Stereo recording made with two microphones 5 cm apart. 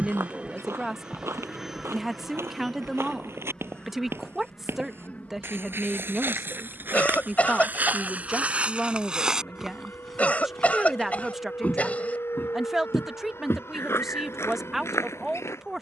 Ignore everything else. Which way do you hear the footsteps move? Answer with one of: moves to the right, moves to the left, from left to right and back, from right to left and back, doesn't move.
moves to the left.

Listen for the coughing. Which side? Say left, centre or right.
left.